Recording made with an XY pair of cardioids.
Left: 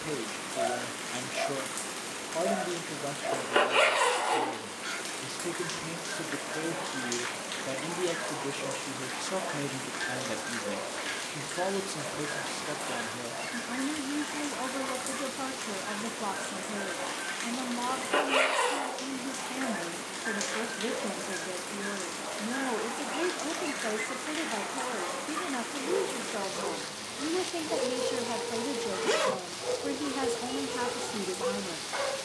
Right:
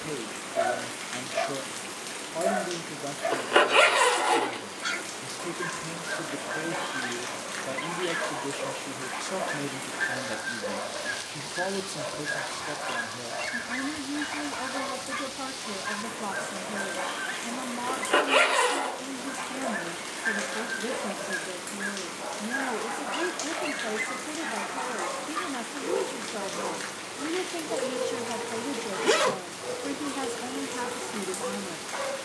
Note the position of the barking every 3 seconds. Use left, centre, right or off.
right, right, right, right, right, right, right, right, right, centre, centre.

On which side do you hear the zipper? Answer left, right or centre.
right.